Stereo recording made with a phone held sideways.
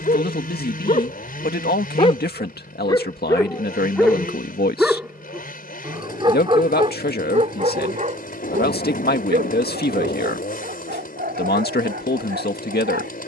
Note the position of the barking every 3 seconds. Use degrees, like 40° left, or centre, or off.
40° left, centre, 40° right, 60° right, 70° right.